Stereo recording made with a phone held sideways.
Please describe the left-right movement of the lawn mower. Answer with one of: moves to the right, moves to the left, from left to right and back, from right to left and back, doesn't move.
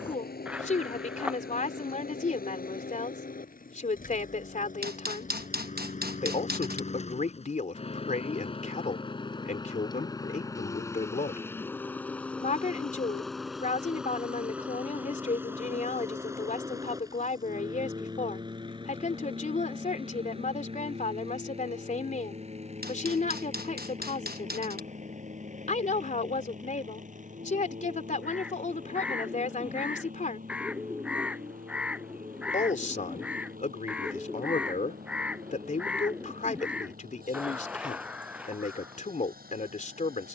moves to the right.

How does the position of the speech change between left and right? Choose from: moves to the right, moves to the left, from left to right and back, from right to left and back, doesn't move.
doesn't move.